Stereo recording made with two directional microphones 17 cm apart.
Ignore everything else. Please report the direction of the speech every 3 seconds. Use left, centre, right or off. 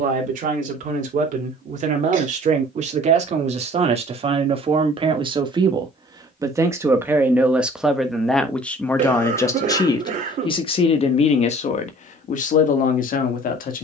right, right, centre, left, left.